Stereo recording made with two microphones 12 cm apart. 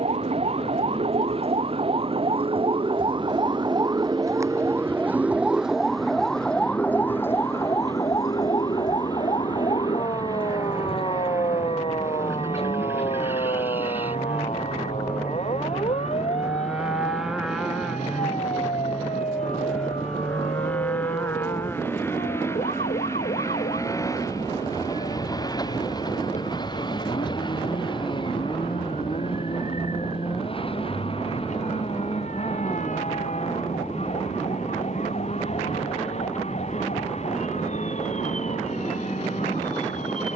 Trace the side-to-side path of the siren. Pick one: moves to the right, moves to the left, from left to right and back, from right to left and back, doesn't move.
moves to the left.